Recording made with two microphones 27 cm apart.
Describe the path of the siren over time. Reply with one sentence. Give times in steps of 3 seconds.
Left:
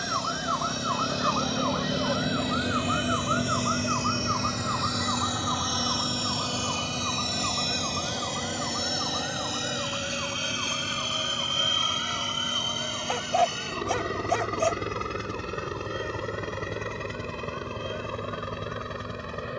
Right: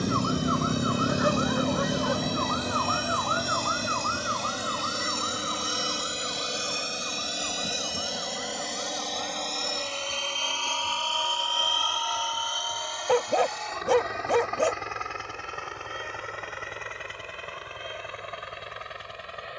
You can hear the siren in the centre from 0 s and on the left from 3 s.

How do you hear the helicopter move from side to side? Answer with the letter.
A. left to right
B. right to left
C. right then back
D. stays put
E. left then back
B.